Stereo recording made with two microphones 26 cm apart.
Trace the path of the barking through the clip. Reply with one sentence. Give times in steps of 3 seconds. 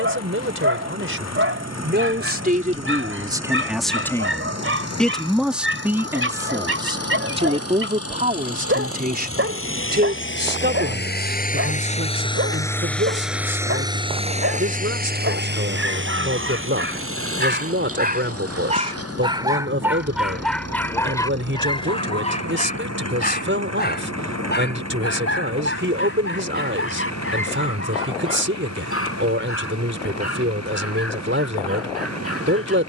You can hear the barking on the right from 0 s, in the centre from 18 s and on the left from 21 s.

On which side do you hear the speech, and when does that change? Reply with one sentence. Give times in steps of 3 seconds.
You can hear the speech on the right from 0 s, in the centre from 3 s and on the right from 6 s.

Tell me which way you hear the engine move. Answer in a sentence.
In this clip you hear the engine move from left to right.